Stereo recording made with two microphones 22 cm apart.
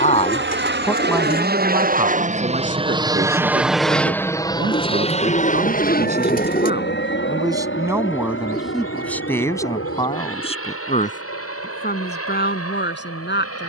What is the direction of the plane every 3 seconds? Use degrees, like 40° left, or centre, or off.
50° right, 10° left, 50° left, 60° left, 70° left.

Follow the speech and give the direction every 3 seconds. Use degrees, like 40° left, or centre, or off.
10° right, 40° right, 20° right, 20° left, 50° left.